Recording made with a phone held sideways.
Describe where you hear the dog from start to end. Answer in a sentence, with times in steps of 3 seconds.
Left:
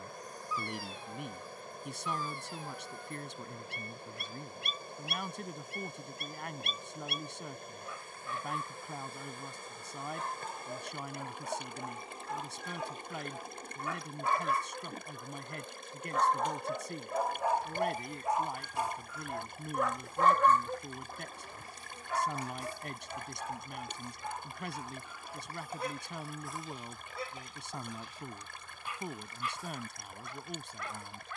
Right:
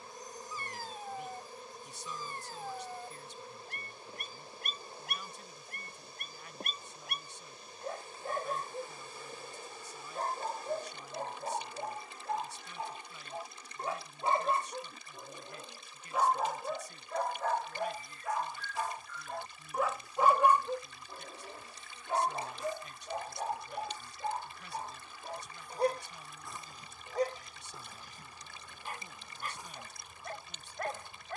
In this clip you hear the dog on the right from 0 s, in the centre from 15 s and on the right from 21 s.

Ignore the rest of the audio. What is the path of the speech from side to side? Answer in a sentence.
In this clip you hear the speech stay in one place.